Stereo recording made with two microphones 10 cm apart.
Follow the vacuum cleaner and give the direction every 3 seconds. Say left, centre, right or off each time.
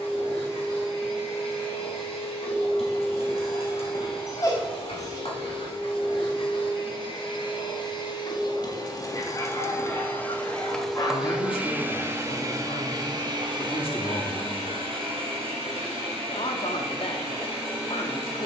left, left, left, centre, right, right.